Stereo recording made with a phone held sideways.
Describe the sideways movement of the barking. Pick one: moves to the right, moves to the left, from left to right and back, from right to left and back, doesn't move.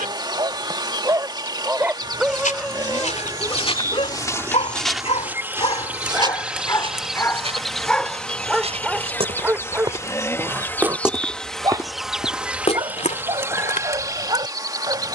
from right to left and back.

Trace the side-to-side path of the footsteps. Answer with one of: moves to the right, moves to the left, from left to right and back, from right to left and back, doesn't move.
from left to right and back.